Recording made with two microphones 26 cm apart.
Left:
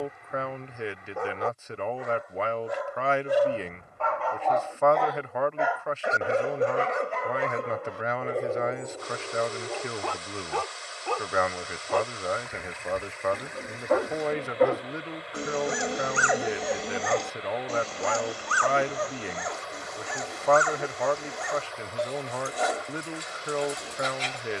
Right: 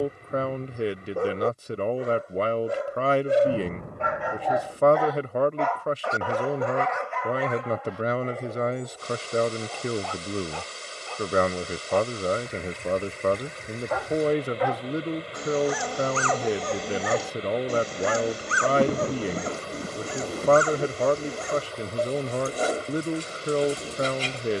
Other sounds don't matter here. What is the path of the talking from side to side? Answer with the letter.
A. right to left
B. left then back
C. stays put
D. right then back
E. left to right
C.